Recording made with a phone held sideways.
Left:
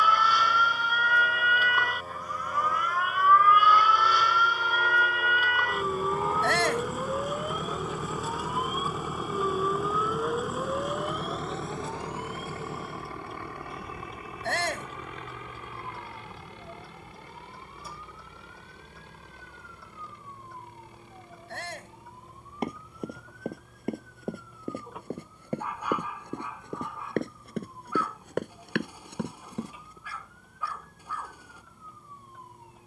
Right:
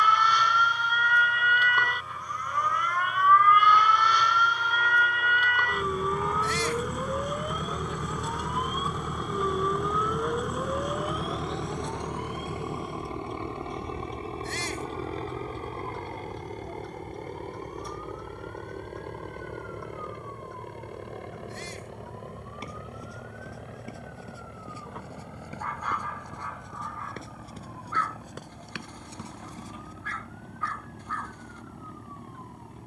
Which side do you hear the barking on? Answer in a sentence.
You can hear the barking in the centre.